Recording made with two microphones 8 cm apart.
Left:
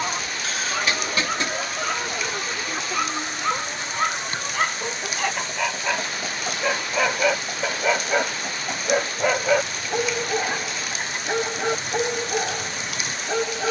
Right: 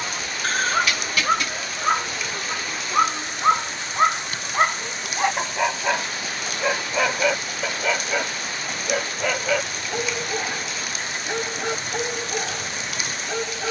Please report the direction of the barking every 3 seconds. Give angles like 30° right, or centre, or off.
40° right, 20° right, centre, 20° left, 20° left.